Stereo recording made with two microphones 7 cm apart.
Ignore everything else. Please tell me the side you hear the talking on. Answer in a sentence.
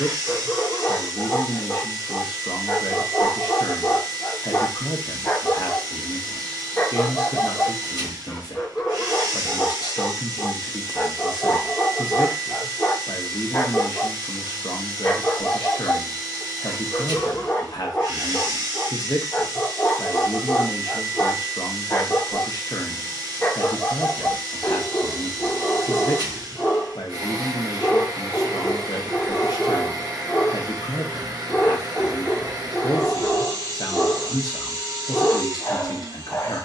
In this clip you hear the talking on the left.